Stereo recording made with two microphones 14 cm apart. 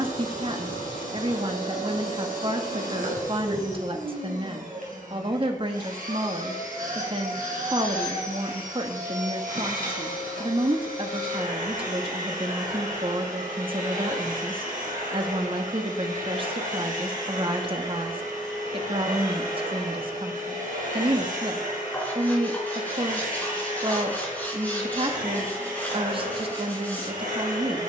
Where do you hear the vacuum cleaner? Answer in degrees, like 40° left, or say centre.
80° right.